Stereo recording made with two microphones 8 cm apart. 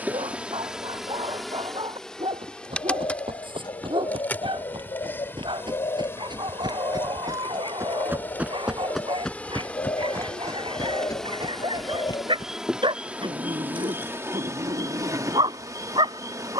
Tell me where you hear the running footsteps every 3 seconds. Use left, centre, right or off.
right, right, right, left, left, off.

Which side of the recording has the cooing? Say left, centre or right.
left.